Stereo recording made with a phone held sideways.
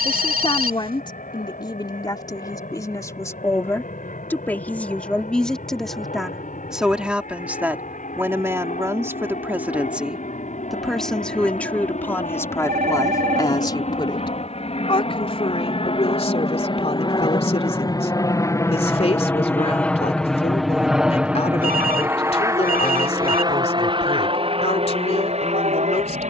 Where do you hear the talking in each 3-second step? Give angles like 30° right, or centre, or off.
30° left, 10° left, 10° right, centre, 20° left, 40° left, 40° left, 40° left, 40° left.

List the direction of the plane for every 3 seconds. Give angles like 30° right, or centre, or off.
70° left, 70° left, 60° left, 60° left, 50° left, 40° left, 10° left, 20° right, 40° right.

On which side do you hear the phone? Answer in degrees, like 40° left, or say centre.
70° right.